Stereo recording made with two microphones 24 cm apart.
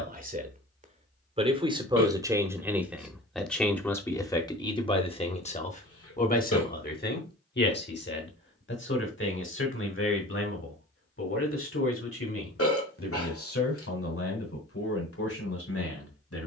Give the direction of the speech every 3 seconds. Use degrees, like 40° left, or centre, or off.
20° right, 20° left, 40° left, 60° left, 70° left, 70° left.